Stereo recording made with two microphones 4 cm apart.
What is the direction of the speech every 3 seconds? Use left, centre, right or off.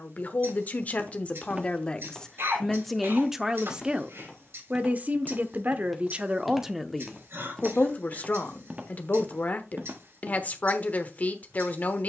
left, right, centre, left.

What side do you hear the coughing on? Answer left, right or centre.
right.